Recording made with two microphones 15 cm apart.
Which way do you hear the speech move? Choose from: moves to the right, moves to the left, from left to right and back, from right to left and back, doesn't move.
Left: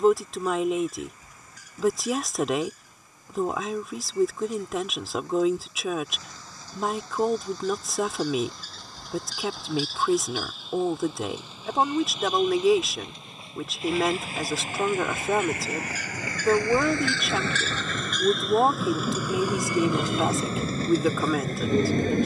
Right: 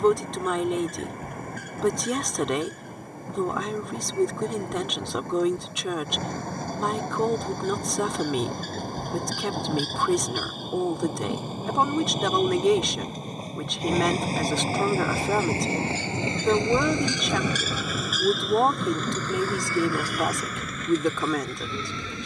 doesn't move.